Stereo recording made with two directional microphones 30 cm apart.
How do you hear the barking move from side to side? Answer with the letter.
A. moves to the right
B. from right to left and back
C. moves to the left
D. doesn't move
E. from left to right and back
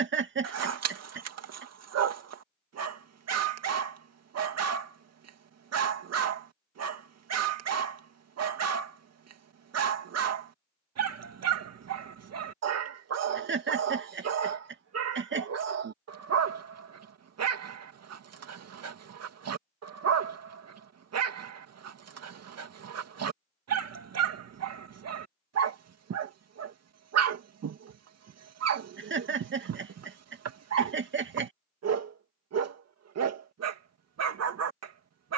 D.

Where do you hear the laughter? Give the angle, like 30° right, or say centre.
40° right.